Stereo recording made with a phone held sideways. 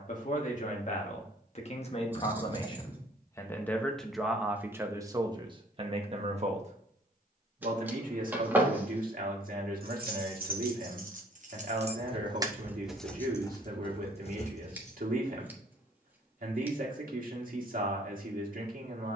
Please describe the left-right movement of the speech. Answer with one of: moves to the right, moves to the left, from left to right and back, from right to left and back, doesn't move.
moves to the right.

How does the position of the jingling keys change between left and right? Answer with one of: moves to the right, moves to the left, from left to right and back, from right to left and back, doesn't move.
moves to the left.